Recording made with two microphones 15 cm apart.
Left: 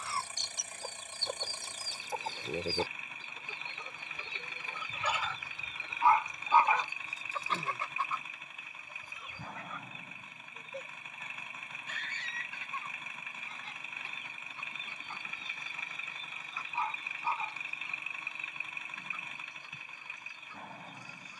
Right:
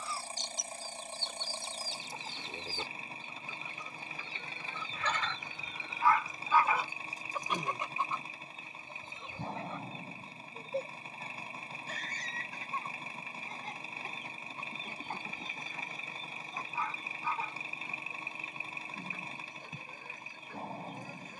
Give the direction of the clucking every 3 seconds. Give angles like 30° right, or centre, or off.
60° left, 20° left, 10° right, 30° right, 40° right, 50° right, 50° right.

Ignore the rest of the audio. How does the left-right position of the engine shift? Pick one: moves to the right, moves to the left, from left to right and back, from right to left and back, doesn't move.
doesn't move.